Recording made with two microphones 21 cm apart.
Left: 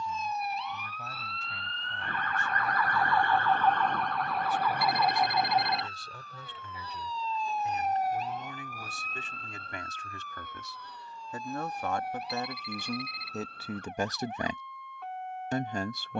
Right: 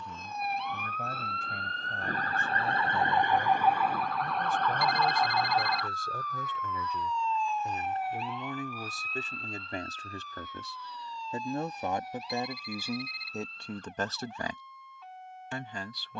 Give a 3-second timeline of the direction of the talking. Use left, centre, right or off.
right, right, right, right, centre, left.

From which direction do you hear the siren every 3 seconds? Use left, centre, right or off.
right, centre, left, left, left, left.